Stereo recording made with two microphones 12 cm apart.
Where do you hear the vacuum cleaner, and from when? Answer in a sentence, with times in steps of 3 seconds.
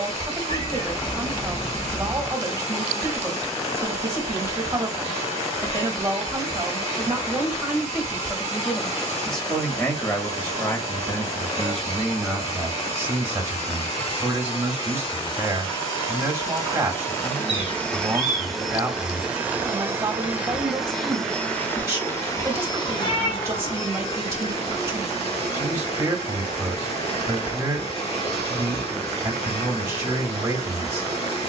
In this clip you hear the vacuum cleaner on the left from 0 s, in the centre from 18 s and on the left from 21 s.